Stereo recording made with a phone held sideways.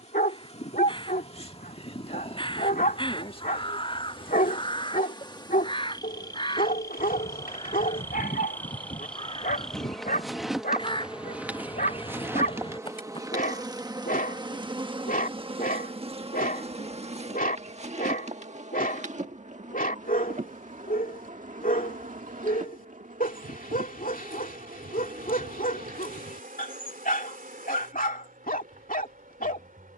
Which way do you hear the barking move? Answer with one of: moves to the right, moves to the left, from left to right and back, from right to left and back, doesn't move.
doesn't move.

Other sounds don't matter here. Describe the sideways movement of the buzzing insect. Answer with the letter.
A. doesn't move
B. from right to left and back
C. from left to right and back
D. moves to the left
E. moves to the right
E.